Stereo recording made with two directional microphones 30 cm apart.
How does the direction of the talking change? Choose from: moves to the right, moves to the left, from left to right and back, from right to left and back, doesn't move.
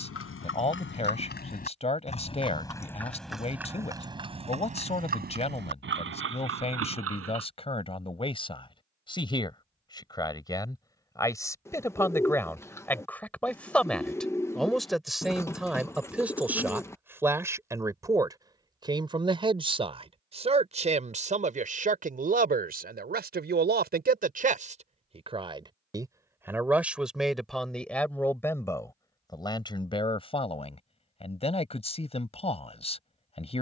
from left to right and back.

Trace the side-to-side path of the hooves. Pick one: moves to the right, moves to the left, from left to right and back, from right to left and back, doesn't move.
moves to the right.